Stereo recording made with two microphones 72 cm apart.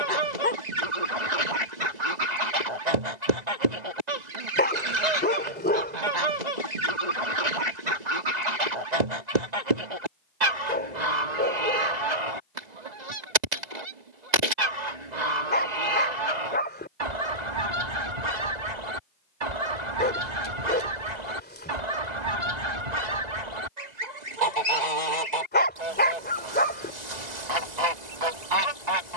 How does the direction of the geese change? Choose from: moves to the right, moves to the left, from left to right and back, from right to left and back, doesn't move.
doesn't move.